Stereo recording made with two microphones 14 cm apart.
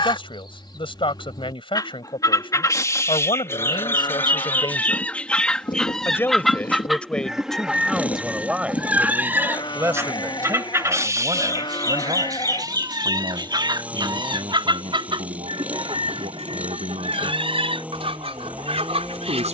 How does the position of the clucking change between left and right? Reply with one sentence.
You can hear the clucking move from left to right.